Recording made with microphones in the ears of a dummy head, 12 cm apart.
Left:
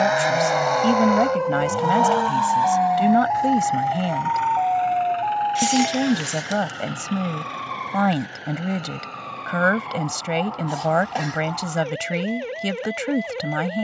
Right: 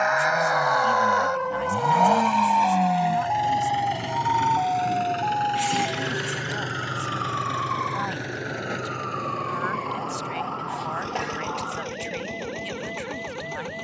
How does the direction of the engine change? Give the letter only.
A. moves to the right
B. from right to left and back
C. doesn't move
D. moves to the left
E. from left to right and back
A.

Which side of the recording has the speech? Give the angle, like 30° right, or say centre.
80° left.